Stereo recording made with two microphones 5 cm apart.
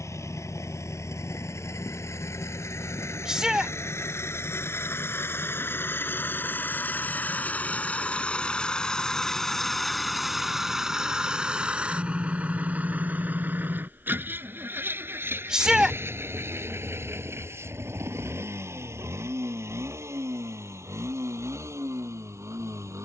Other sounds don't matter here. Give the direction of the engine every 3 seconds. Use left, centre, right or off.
left, left, left, centre, right, right, right, right.